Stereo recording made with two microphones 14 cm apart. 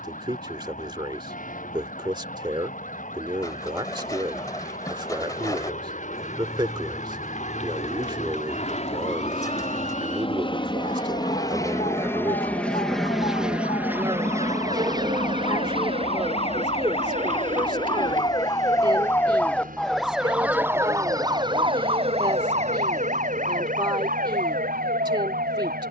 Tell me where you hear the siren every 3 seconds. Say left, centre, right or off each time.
left, left, left, left, left, left, centre, right, right.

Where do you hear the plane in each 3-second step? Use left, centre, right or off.
left, left, left, left, centre, right, right, right, right.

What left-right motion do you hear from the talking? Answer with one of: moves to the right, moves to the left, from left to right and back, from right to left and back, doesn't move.
doesn't move.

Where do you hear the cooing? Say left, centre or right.
left.